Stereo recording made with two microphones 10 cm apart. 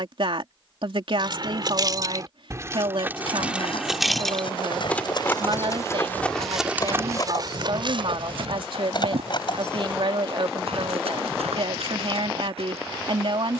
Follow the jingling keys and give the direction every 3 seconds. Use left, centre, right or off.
right, centre, left, left, off.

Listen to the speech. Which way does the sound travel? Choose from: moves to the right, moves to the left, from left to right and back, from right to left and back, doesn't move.
doesn't move.